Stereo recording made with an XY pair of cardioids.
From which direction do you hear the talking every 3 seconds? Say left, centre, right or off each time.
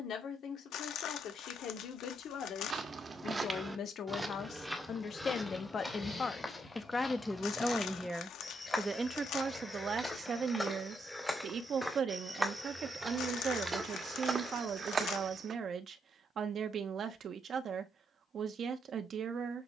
left, left, centre, right, right, right, right.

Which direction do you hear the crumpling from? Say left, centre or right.
left.